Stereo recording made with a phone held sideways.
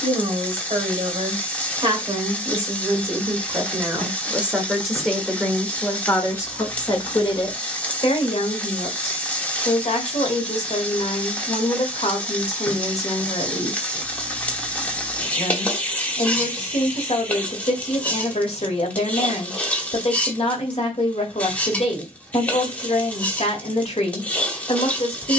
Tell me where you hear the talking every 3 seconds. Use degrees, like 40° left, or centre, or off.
40° right, 10° right, 40° left, 50° left, 50° left, 50° left, 50° left, 50° left, 50° left.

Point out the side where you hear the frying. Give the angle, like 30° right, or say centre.
10° left.